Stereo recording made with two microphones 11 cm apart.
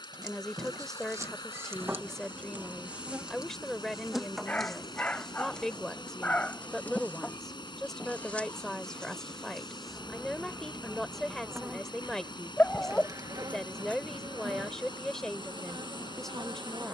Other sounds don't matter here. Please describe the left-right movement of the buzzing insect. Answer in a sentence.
You can hear the buzzing insect move from right to left and back again.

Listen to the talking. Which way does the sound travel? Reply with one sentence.
In this clip you hear the talking stay in one place.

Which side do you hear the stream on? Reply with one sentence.
You can hear the stream on the left.